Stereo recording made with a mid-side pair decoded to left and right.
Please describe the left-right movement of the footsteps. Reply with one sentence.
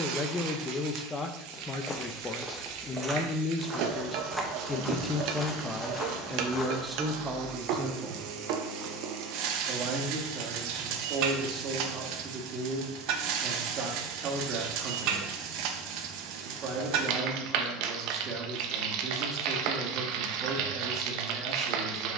You can hear the footsteps go right and come back.